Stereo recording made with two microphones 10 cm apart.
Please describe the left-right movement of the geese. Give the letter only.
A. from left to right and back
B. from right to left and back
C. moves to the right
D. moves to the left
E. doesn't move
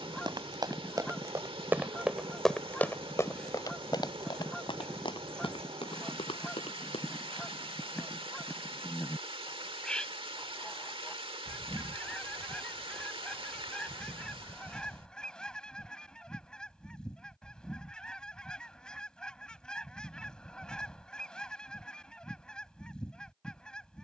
E.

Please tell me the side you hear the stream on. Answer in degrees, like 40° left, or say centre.
60° right.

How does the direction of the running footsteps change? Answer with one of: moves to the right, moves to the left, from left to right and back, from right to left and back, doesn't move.
moves to the left.